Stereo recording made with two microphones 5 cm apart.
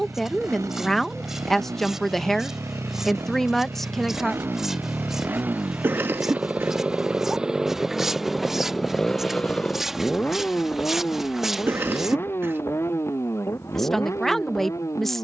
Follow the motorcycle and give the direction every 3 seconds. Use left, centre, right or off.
right, right, centre, left, left.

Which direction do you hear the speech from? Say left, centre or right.
centre.